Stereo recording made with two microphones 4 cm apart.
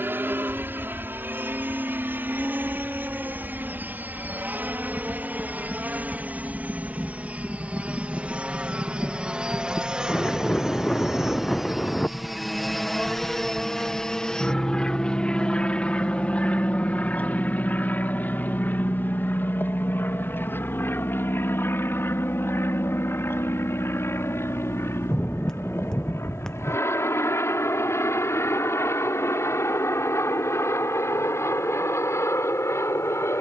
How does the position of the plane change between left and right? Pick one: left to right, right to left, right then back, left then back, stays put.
right to left.